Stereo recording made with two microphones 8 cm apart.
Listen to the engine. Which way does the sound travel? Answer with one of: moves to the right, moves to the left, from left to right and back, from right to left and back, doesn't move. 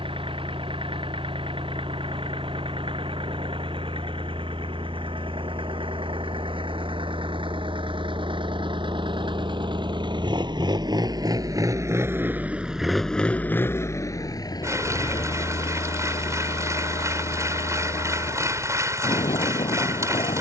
moves to the left.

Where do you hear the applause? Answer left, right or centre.
right.